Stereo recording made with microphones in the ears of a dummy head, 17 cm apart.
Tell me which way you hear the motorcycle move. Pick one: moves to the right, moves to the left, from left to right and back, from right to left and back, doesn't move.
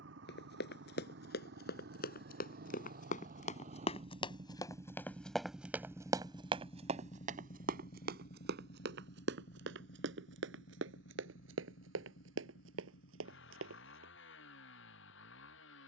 moves to the left.